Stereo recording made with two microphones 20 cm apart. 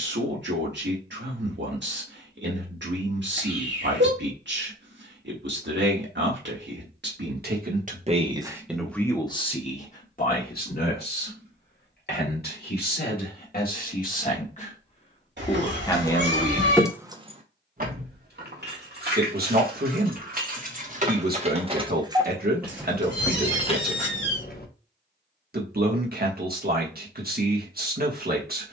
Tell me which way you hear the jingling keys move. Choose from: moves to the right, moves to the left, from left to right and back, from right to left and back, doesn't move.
from left to right and back.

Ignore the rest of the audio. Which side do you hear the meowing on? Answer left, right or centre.
right.